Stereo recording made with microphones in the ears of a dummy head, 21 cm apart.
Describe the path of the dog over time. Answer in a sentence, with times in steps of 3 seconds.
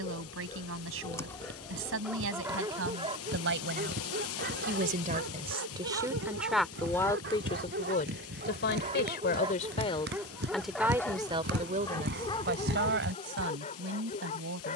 In this clip you hear the dog in the centre from 0 s, on the right from 3 s, in the centre from 9 s and on the left from 12 s.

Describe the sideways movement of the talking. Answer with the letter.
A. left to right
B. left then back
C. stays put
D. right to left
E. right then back
B.